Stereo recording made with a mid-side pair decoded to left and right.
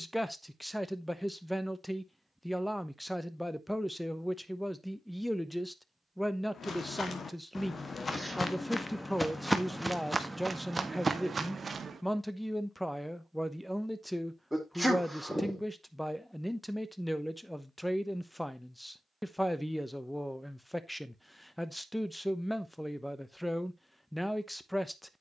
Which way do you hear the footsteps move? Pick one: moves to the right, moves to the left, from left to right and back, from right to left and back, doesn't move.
moves to the right.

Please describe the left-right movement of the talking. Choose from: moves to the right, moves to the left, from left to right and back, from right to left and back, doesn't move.
doesn't move.